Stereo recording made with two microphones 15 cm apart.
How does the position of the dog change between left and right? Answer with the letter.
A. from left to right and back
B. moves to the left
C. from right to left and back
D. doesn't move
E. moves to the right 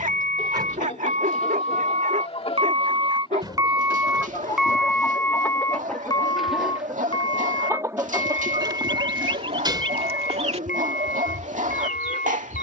D.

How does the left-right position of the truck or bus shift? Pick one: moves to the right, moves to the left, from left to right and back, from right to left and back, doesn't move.
moves to the left.